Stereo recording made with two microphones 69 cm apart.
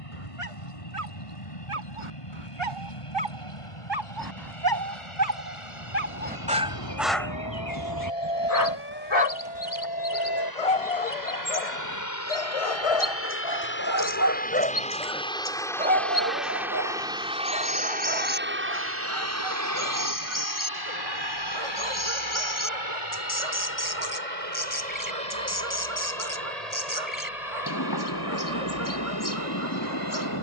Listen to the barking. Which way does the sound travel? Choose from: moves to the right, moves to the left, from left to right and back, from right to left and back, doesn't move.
from right to left and back.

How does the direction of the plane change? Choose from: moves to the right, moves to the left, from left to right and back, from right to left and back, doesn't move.
moves to the right.